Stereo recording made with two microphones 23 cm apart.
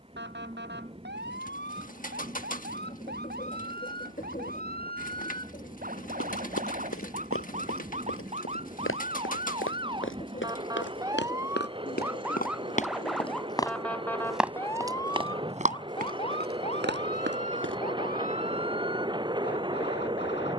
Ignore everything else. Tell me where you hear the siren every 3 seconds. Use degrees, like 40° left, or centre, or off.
50° right, 40° right, 30° right, 20° right, centre, 30° left, 50° left.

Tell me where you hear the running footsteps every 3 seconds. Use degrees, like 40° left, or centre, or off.
off, off, 70° left, 60° left, 20° left, 40° right, off.